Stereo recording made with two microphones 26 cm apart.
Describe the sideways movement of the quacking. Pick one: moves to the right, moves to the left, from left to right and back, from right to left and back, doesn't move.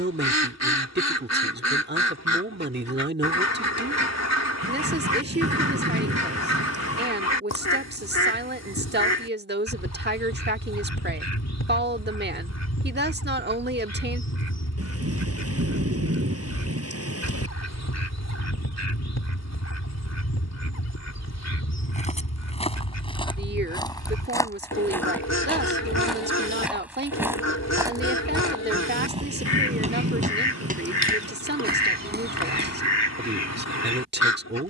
doesn't move.